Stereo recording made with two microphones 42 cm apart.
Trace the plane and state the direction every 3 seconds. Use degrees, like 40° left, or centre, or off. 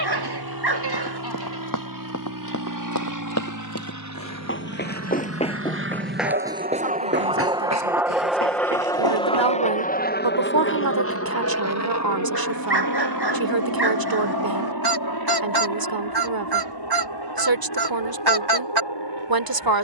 60° right, 40° right, 10° right, 30° left, 50° left, 60° left, 70° left.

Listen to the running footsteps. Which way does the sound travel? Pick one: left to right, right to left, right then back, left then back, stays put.
left to right.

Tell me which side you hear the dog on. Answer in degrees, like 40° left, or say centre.
70° right.